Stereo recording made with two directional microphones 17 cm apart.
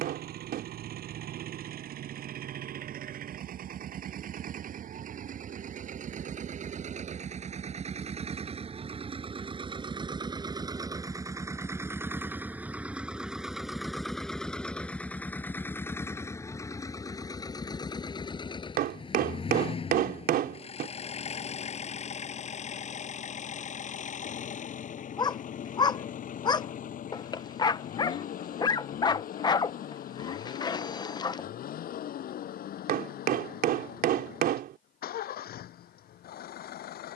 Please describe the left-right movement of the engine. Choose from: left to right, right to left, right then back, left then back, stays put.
right to left.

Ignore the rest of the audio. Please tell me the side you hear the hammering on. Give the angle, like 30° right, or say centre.
60° right.